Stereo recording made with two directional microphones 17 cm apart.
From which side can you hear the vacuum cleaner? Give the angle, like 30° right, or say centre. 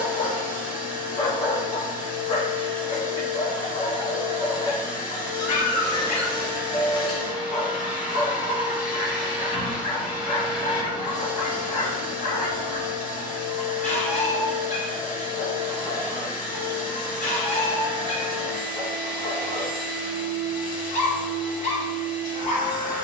50° left.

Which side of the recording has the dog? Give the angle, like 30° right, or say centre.
40° left.